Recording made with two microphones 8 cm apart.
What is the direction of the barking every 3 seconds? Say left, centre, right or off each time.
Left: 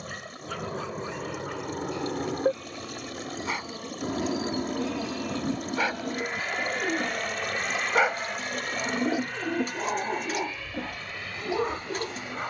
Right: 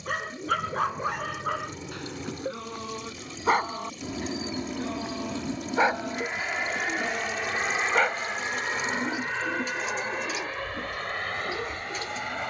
right, right, centre, left.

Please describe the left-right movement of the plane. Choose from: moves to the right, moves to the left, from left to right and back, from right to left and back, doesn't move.
moves to the right.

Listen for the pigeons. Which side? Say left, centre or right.
left.